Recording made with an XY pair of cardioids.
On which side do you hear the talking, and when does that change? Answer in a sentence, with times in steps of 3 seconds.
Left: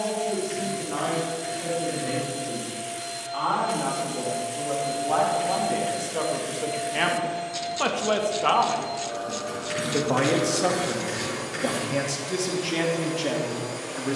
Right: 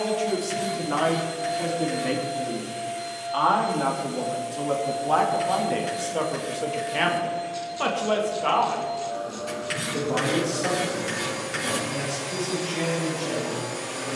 In this clip you hear the talking on the right from 0 s, in the centre from 6 s and on the left from 9 s.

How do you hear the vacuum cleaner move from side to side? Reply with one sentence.
In this clip you hear the vacuum cleaner move from right to left and back again.